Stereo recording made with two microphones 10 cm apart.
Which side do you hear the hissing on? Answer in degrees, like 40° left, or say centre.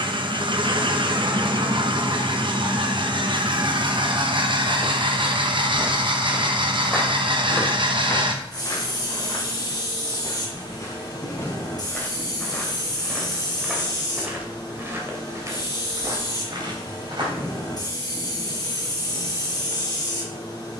40° left.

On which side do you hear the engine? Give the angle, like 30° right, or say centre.
50° right.